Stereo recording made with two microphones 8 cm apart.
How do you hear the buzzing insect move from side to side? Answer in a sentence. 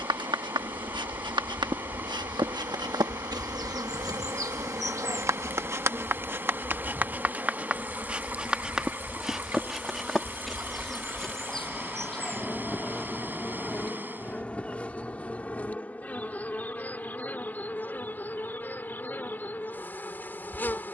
You can hear the buzzing insect travel towards the left.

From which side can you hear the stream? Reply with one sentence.
In this clip you hear the stream on the right.